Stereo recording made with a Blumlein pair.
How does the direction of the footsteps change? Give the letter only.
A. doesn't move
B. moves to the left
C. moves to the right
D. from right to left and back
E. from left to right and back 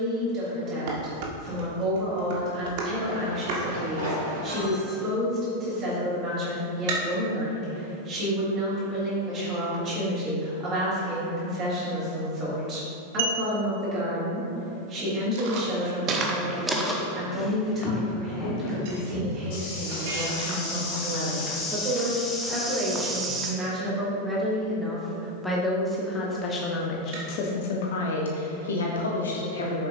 D.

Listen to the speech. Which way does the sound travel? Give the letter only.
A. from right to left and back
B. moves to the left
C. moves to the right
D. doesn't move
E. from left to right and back
B.